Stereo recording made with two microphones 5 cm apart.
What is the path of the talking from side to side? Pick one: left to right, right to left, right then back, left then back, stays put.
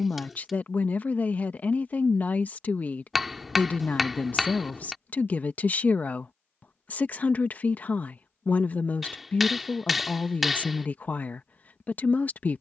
stays put.